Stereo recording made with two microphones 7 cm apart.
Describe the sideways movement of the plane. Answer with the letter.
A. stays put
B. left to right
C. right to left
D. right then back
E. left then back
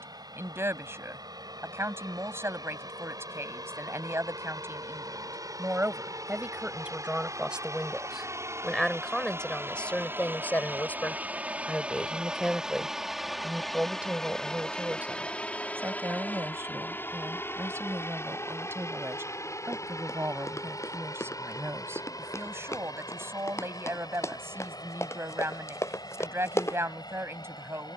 C.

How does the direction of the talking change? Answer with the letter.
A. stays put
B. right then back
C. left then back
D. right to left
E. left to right
C.